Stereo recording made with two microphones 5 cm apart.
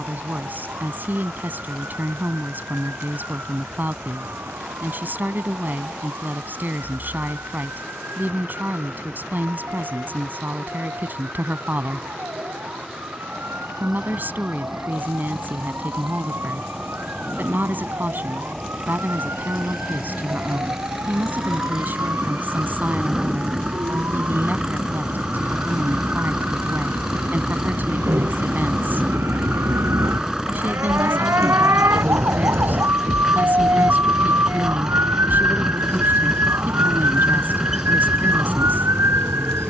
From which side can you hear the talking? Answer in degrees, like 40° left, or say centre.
40° right.